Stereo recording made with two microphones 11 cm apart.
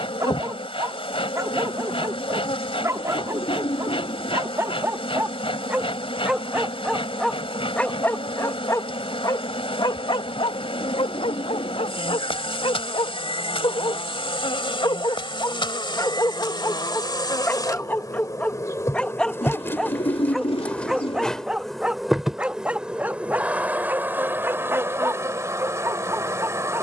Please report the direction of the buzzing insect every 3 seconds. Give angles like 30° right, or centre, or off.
50° left, 50° left, 50° left, 50° left, 50° left, 40° left, 20° left, centre, 20° right.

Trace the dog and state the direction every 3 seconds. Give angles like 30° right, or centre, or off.
30° right, 20° right, 10° left, 50° left, 50° left, 30° left, 10° left, 10° right, 20° right.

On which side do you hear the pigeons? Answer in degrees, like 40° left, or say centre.
60° left.